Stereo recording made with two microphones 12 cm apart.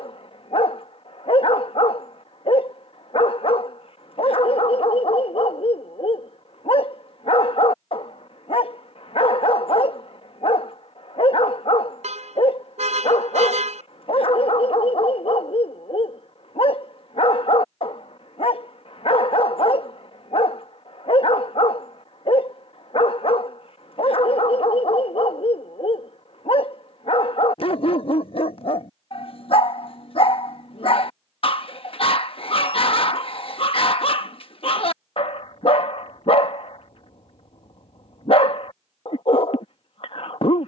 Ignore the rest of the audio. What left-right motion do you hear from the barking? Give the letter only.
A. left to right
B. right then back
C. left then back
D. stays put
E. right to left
D.